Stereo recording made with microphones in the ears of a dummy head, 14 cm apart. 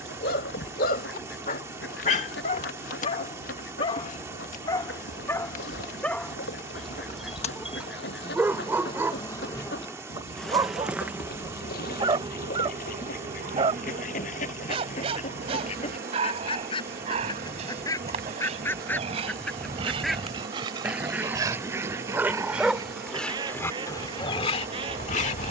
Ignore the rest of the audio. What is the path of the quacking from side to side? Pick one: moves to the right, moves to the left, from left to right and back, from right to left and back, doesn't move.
moves to the right.